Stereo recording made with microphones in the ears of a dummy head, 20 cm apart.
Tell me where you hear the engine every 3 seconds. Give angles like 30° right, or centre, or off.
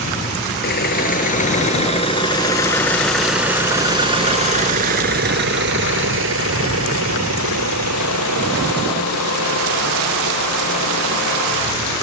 30° left, 30° right, 70° right, 80° right.